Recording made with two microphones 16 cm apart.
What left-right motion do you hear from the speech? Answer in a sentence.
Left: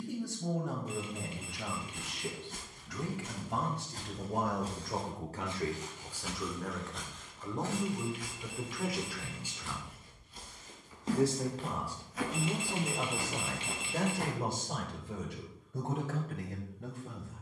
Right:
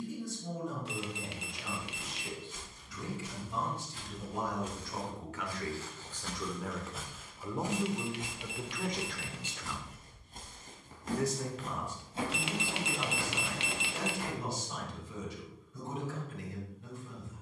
In this clip you hear the speech move from left to right and back again.